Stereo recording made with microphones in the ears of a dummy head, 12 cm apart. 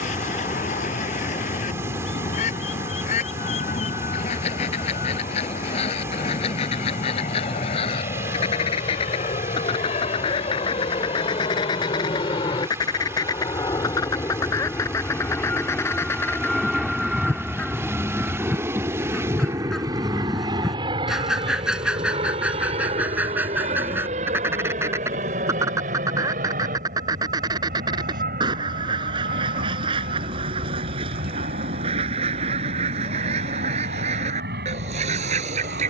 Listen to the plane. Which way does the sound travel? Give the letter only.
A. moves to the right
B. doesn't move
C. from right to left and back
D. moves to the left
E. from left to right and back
A.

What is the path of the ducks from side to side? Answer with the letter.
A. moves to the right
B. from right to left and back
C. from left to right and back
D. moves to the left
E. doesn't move
A.